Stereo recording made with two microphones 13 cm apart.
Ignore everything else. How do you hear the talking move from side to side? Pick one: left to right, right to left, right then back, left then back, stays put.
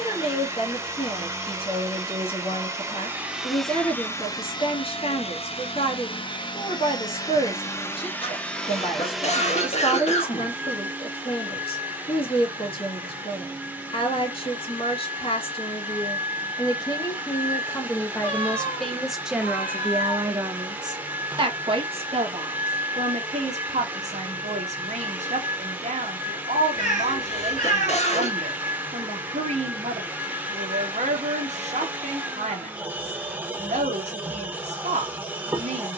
left to right.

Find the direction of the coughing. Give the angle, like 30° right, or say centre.
50° left.